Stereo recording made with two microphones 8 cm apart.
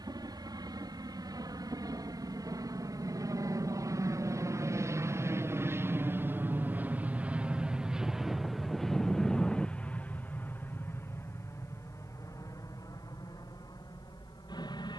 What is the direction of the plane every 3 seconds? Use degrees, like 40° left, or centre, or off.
60° right, 40° right, 10° right, 20° left, 50° left.